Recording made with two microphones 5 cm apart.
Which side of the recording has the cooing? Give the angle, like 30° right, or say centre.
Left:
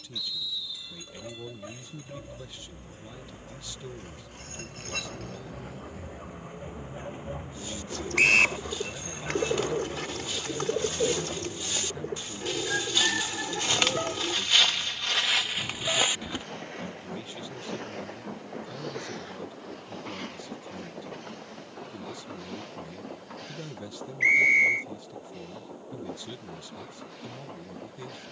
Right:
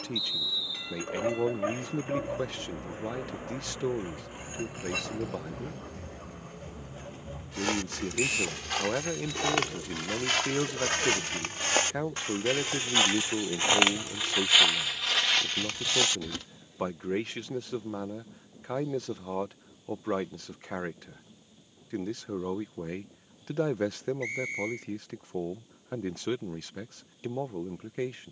60° left.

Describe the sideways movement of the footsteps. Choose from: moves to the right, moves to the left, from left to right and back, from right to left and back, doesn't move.
moves to the left.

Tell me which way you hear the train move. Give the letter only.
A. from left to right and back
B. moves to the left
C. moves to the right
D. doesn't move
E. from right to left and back
B.